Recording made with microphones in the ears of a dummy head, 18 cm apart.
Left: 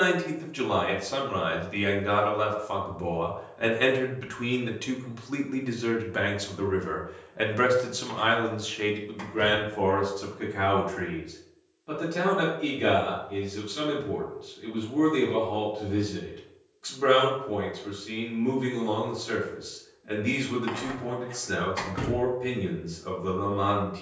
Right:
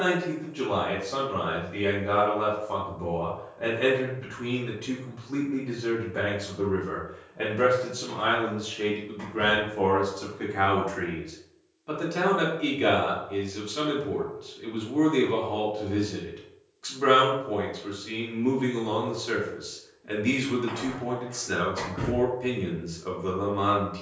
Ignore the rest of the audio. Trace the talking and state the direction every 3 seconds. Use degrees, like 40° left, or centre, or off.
70° left, 70° left, 50° left, centre, 10° right, 10° right, 10° right, 10° right.